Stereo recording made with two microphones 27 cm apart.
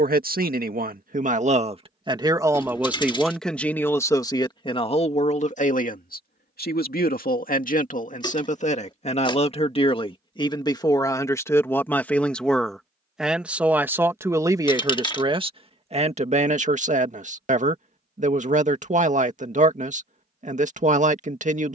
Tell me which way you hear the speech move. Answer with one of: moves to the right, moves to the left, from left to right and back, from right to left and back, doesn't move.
from right to left and back.